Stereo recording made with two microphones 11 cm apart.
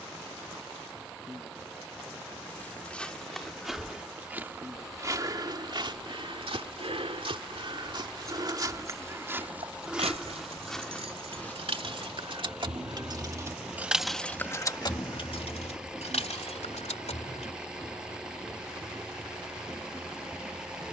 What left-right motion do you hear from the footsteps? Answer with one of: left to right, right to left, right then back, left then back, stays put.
right then back.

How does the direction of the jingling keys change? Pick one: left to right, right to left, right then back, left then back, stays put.
right to left.